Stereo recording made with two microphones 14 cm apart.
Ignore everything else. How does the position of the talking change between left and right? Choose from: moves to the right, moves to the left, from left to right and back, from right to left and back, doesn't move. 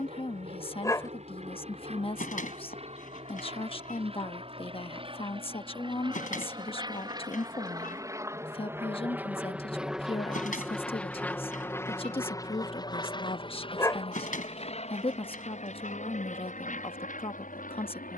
doesn't move.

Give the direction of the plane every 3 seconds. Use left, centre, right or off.
right, right, right, centre, left, left.